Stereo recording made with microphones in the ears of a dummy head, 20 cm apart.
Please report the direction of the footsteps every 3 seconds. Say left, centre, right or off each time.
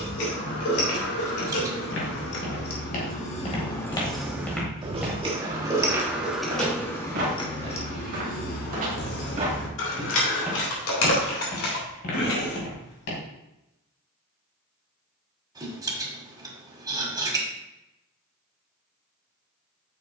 left, centre, right, centre, left, off, off.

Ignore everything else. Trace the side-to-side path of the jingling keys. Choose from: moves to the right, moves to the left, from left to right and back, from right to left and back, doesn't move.
from left to right and back.